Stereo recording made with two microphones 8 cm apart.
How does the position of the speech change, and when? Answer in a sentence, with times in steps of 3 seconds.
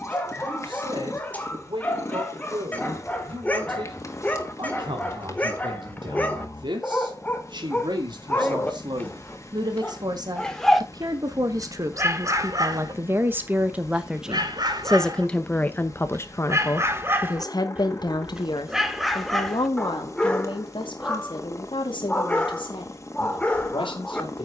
You can hear the speech on the right from 0 s and on the left from 15 s.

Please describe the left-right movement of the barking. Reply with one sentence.
You can hear the barking move from left to right and back again.